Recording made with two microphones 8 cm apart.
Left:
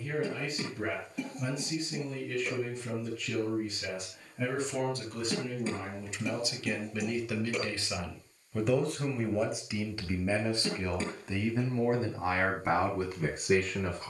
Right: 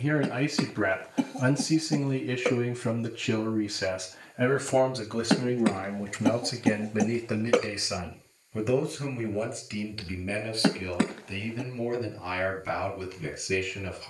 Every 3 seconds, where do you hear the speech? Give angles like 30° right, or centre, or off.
70° right, 60° right, 20° right, 20° left, 40° left.